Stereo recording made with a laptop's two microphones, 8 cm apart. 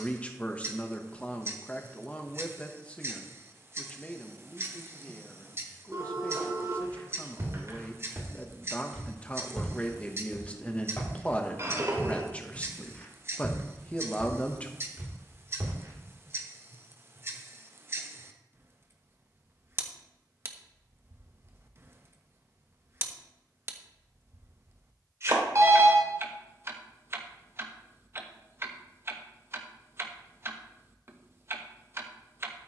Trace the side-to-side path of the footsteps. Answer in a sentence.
In this clip you hear the footsteps go left and come back.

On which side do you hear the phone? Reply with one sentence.
You can hear the phone on the right.